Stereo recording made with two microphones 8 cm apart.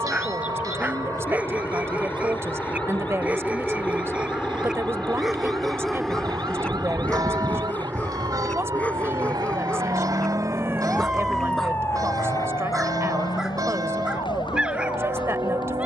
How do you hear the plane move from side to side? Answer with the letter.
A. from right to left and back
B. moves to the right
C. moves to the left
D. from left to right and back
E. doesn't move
B.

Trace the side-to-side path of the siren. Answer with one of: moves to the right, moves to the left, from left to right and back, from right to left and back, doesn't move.
moves to the left.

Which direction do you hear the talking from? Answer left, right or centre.
right.